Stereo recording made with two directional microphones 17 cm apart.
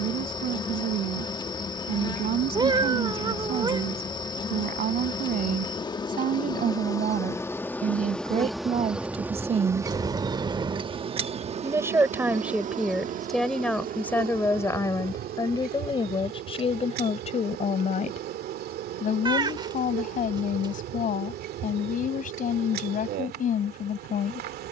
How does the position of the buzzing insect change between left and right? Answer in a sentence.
You can hear the buzzing insect move from left to right.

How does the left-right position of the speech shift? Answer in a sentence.
In this clip you hear the speech move from right to left.